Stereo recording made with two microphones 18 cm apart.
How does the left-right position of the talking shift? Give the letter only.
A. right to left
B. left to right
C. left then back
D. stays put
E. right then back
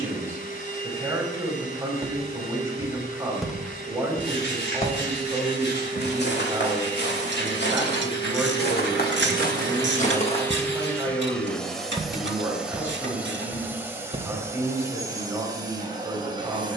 D.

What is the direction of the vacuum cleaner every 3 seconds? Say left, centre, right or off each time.
left, left, left, centre, centre, right.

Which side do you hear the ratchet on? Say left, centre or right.
right.